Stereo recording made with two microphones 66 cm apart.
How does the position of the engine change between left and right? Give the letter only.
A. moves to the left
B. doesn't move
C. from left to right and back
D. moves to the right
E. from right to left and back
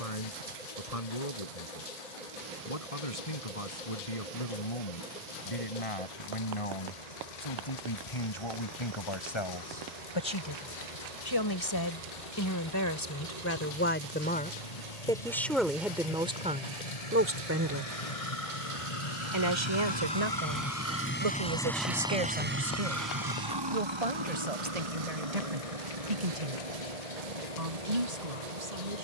D.